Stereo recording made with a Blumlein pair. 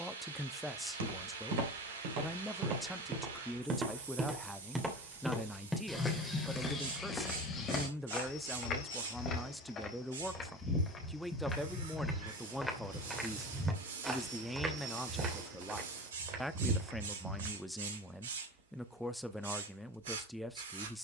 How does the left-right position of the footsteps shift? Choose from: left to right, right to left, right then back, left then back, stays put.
left then back.